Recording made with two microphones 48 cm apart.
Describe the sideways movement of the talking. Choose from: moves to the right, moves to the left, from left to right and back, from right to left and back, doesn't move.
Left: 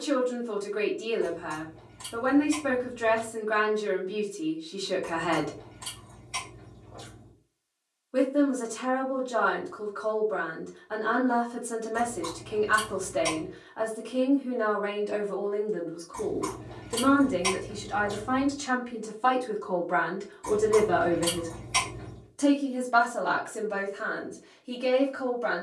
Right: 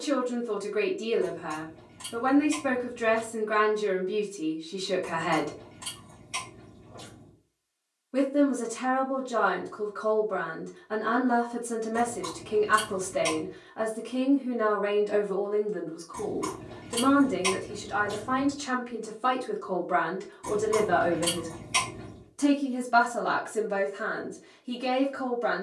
from right to left and back.